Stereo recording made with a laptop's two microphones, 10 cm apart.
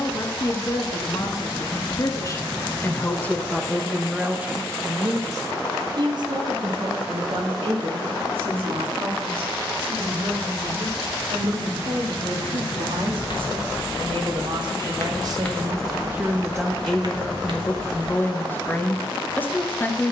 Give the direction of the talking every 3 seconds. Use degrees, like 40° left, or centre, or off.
40° left, 10° right, 60° right, 70° right, 60° right, 10° right, 20° left.